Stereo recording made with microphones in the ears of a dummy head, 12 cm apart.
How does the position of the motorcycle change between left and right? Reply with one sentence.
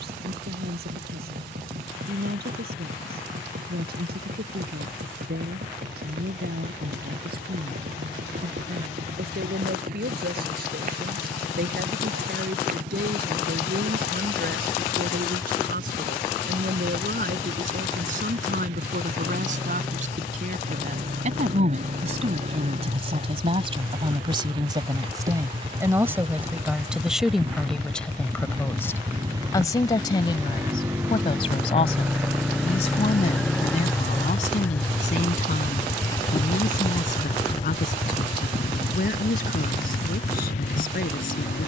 In this clip you hear the motorcycle move from right to left.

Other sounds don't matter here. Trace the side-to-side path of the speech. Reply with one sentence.
You can hear the speech travel towards the left.